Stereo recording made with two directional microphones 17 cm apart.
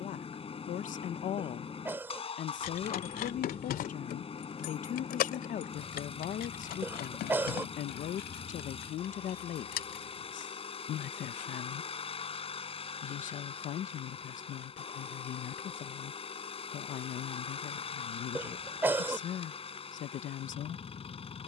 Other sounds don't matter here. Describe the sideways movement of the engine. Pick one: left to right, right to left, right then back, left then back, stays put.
stays put.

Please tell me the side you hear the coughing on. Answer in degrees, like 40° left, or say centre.
10° right.